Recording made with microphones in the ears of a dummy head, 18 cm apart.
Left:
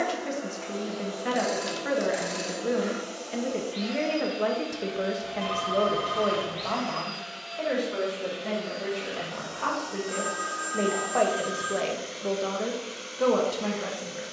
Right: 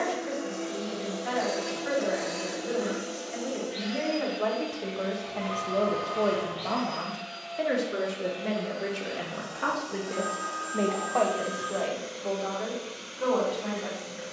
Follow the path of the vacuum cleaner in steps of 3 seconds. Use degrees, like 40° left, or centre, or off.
40° right, centre, 30° left, 40° left, 40° left.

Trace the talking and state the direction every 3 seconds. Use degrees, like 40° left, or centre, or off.
60° left, 30° left, 20° right, centre, 50° left.